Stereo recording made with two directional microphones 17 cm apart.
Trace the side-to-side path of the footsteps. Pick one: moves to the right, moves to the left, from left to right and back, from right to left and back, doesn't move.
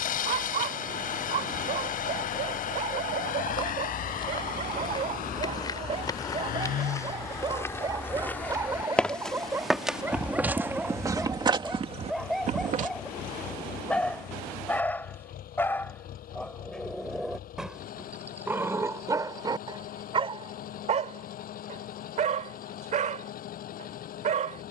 moves to the right.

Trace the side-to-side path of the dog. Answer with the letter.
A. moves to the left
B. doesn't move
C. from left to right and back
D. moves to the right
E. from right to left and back
E.